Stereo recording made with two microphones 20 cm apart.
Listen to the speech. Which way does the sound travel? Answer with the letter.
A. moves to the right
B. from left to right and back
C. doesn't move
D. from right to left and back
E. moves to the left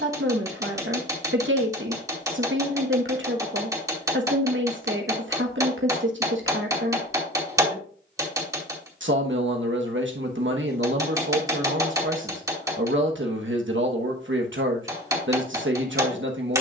C.